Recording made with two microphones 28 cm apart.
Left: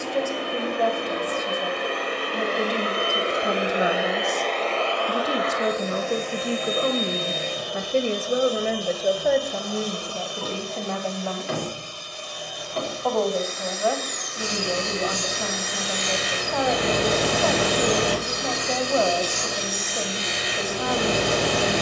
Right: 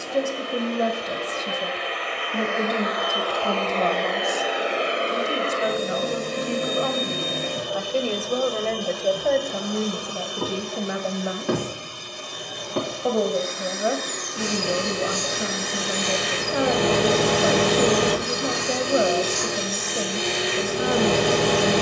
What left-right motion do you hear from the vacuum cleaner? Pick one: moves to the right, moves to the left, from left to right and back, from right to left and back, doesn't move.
moves to the right.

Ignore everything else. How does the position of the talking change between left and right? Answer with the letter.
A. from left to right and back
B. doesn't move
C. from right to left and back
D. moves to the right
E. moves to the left
C.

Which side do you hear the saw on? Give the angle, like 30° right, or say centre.
60° right.